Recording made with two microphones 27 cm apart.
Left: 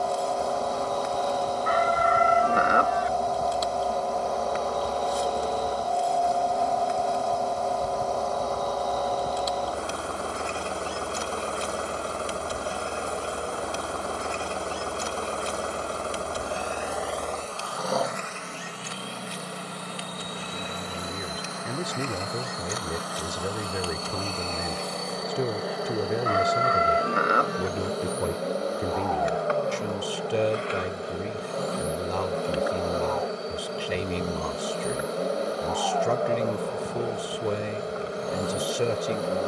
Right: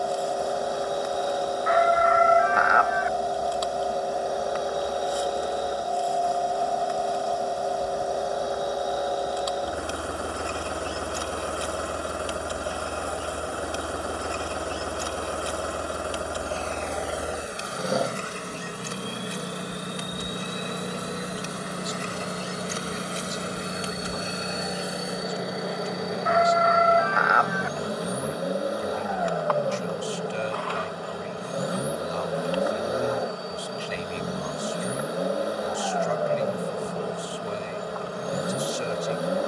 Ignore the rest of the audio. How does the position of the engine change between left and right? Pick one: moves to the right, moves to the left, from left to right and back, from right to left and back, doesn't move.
doesn't move.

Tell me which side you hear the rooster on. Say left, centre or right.
left.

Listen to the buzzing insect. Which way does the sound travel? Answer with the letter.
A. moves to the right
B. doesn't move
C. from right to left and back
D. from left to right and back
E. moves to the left
D.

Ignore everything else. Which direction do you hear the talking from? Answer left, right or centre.
left.